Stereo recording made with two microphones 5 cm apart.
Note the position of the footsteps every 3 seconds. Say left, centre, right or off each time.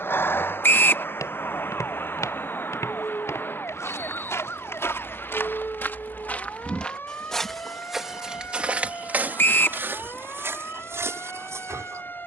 left, left, centre, right.